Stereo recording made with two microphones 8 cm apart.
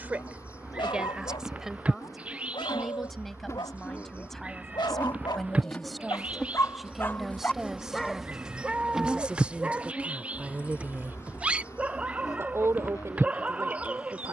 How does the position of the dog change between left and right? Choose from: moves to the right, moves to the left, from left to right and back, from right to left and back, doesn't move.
moves to the right.